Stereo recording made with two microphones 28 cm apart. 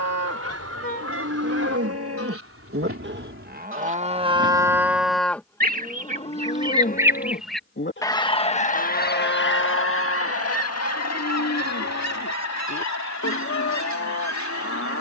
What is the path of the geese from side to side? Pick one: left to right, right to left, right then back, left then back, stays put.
right to left.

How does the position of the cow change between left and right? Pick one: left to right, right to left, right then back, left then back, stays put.
right to left.